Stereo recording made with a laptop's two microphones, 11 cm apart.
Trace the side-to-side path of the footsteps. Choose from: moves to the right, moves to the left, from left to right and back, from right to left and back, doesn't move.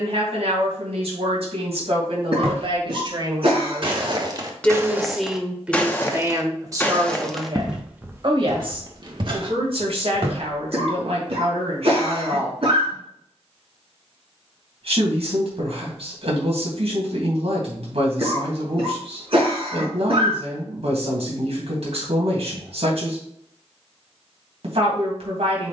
from right to left and back.